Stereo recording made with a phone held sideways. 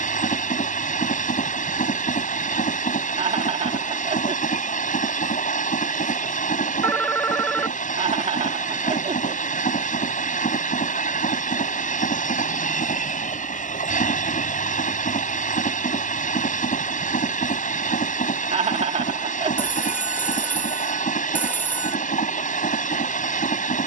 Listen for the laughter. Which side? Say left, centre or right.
right.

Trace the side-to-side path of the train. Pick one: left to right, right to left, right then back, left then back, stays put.
stays put.